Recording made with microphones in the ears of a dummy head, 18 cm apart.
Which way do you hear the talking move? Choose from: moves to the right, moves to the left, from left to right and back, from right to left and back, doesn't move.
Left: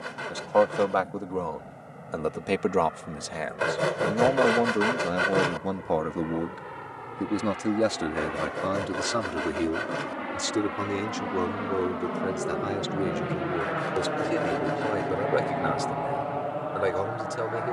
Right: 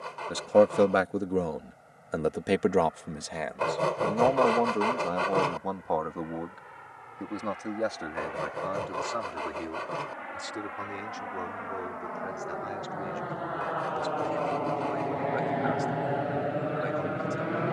moves to the left.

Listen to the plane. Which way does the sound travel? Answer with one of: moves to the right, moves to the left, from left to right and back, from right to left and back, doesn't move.
moves to the right.